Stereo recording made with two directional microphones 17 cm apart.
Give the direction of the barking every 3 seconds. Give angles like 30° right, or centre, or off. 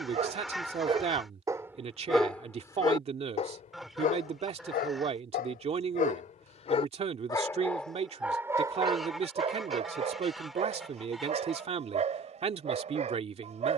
10° right, 50° left, 10° left, 40° right, 40° right.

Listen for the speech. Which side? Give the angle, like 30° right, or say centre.
40° right.